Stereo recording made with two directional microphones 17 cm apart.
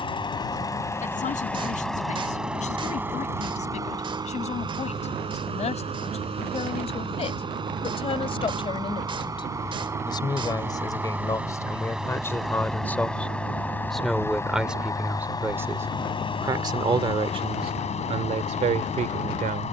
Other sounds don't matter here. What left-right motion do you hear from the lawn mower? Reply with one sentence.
In this clip you hear the lawn mower move from left to right and back again.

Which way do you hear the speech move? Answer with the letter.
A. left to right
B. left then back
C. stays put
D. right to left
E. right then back
A.